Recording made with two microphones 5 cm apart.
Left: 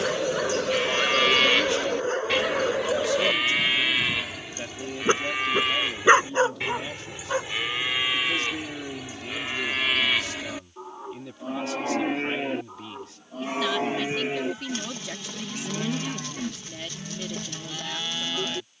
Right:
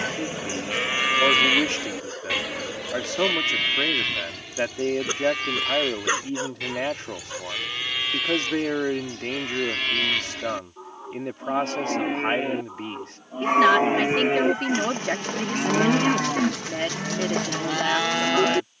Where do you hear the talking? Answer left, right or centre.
right.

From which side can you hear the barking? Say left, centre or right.
left.